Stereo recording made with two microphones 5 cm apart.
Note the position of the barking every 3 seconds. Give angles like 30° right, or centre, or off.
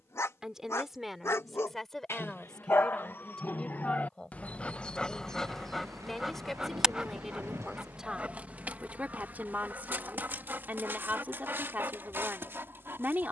60° left, 30° left, 20° right, 40° right, 50° right.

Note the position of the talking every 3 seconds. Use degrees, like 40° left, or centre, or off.
centre, 20° left, 10° right, 30° right, 40° right.